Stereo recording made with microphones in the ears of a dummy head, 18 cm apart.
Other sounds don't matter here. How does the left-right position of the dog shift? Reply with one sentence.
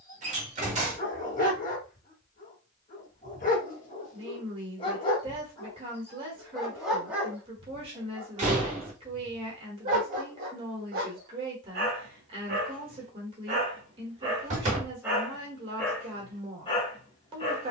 In this clip you hear the dog move from left to right and back again.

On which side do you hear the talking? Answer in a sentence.
You can hear the talking on the right.